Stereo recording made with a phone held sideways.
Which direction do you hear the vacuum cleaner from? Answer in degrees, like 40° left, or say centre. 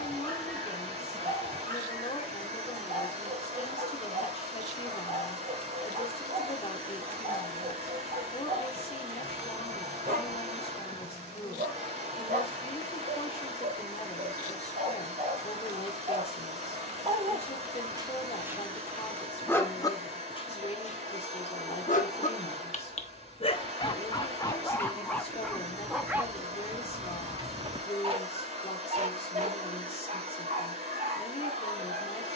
40° right.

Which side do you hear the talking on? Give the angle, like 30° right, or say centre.
40° left.